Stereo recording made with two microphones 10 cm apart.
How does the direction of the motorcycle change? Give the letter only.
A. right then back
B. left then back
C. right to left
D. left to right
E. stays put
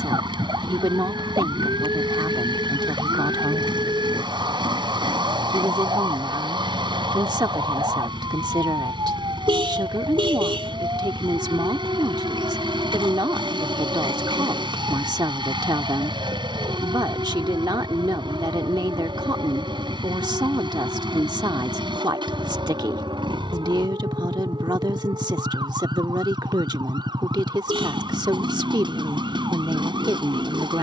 E.